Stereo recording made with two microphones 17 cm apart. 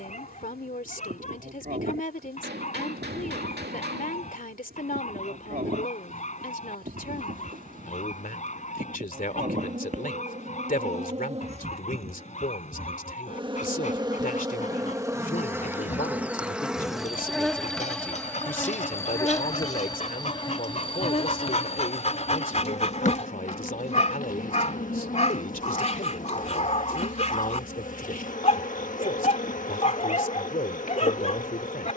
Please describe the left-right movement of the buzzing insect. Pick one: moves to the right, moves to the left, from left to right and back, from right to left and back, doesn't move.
moves to the left.